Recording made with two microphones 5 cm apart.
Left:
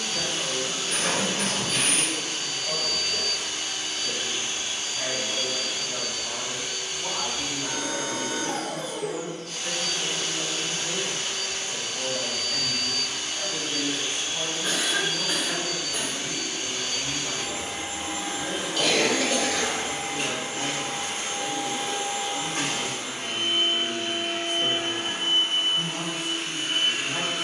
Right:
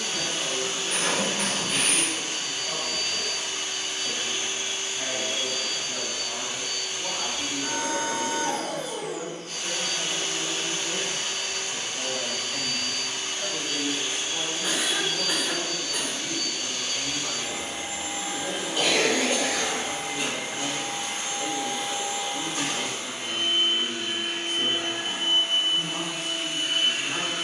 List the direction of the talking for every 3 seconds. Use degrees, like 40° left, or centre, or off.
30° left, 30° left, 30° left, 30° left, 10° left, 40° right, 50° right, 50° right, 50° right.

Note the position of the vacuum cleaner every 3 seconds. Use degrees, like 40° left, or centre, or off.
30° right, 30° right, 30° right, 30° right, 20° right, 20° left, 50° left, 50° left, 50° left.